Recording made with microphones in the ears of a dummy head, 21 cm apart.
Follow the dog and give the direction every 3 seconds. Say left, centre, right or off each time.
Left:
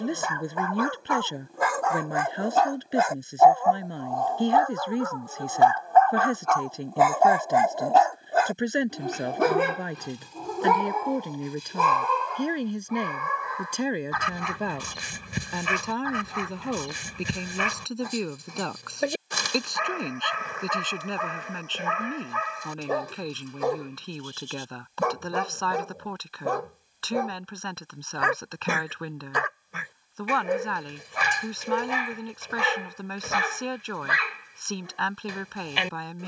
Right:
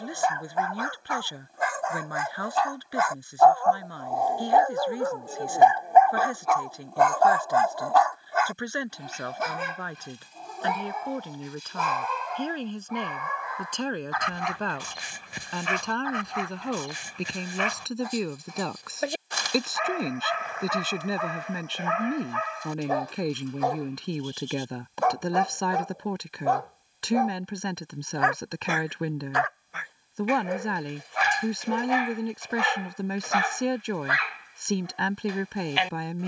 left, centre, centre, left, left, left, left, left, left, left, left, left.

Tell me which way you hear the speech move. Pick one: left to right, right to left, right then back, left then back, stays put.
left to right.